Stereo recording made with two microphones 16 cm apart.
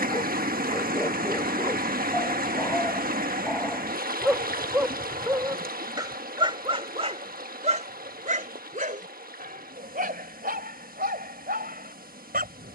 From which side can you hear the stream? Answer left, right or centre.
right.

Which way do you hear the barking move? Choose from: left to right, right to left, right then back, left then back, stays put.
left to right.